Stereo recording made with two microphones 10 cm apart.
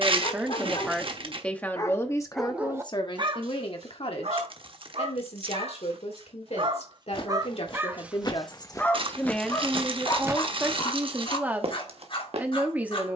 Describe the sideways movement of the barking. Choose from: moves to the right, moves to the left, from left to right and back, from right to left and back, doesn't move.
from left to right and back.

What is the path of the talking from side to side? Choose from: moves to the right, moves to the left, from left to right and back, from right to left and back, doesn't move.
from right to left and back.